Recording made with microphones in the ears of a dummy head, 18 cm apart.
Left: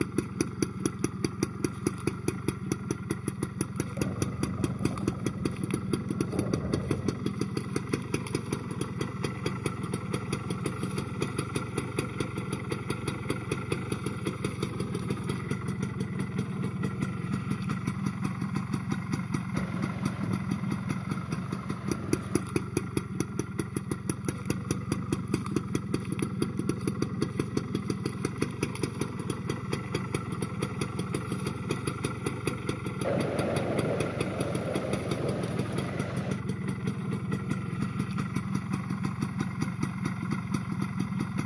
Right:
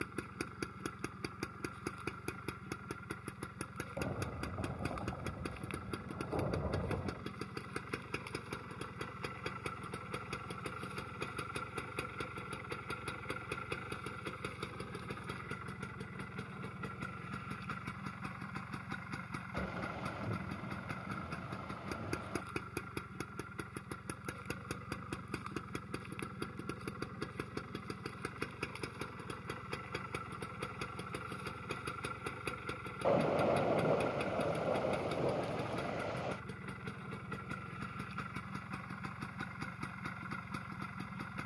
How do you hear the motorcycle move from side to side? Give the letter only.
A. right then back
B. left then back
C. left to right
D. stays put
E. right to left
D.